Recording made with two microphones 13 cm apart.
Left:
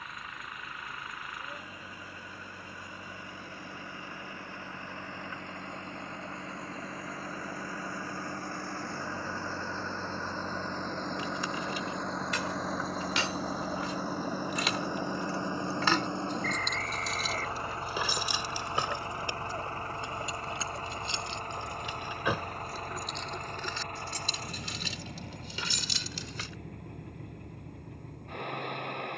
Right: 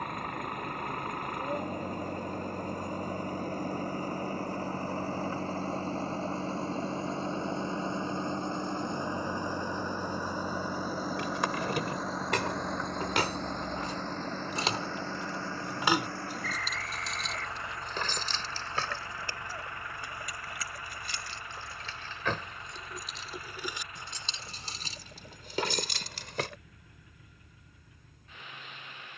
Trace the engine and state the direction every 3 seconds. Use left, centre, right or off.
right, right, right, centre, centre, left, left, left, left, left.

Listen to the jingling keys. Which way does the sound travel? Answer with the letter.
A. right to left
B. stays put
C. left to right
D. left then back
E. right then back
D.